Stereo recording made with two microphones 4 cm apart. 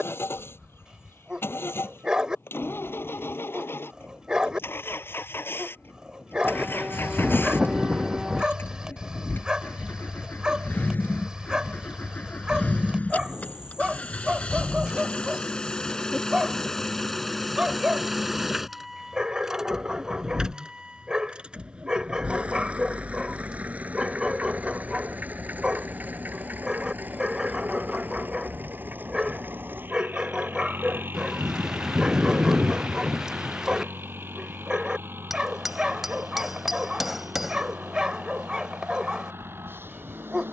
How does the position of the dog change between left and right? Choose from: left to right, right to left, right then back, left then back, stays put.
stays put.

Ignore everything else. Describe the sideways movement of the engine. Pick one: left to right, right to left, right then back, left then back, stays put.
left to right.